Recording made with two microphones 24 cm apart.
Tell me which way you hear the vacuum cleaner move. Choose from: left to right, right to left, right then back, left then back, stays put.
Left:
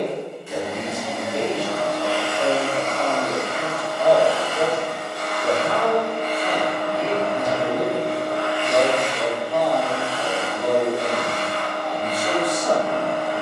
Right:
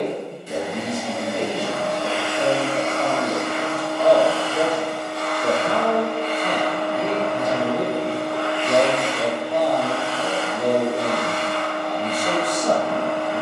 right to left.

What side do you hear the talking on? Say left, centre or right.
right.